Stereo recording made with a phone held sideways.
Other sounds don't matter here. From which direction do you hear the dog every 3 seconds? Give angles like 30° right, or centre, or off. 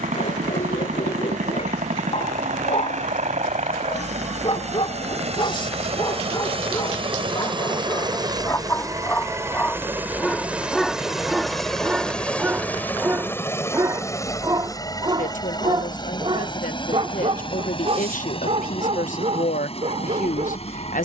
60° left, 40° left, 30° left, centre, 20° right, 40° right, 50° right.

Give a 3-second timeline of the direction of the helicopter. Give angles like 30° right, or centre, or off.
70° right, 60° right, 40° right, 10° right, 20° left, 30° left, 40° left.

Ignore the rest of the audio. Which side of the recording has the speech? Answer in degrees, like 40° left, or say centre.
80° left.